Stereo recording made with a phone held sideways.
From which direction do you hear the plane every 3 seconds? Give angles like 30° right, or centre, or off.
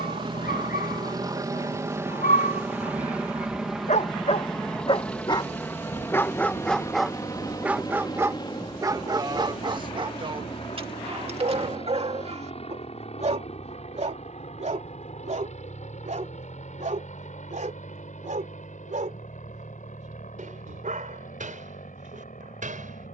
20° right, centre, 20° left, 30° left, 40° left, 50° left, 50° left, 50° left.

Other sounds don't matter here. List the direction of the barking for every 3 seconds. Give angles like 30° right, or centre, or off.
70° left, 40° left, 10° right, 40° right, 50° right, 60° right, 60° right, 60° right.